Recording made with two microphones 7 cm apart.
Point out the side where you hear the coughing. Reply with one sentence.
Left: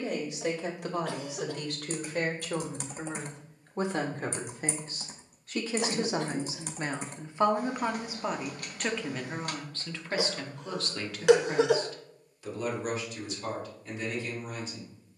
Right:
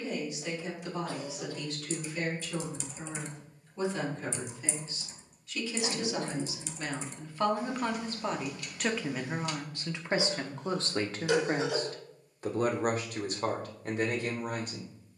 In this clip you hear the coughing on the left.